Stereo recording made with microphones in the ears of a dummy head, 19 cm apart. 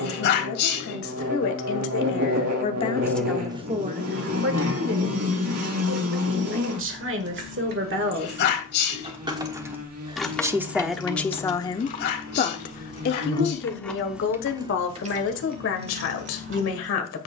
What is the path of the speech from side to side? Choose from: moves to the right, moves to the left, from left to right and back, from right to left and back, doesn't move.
from left to right and back.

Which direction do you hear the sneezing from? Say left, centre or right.
left.